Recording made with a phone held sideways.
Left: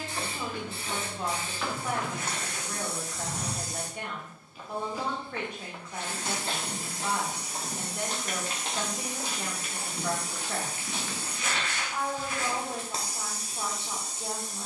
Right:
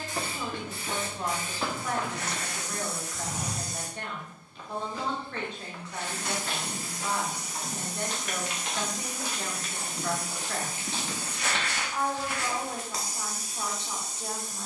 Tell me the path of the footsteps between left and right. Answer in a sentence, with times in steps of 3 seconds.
You can hear the footsteps on the right from 0 s, in the centre from 3 s, on the left from 6 s, in the centre from 9 s and not at all from 12 s.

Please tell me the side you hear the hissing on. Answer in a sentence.
In this clip you hear the hissing on the left.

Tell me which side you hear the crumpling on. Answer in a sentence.
You can hear the crumpling on the right.